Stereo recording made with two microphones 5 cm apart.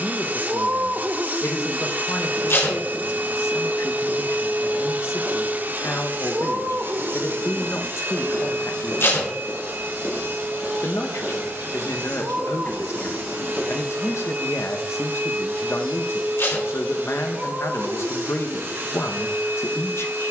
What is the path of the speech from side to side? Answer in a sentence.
You can hear the speech stay put.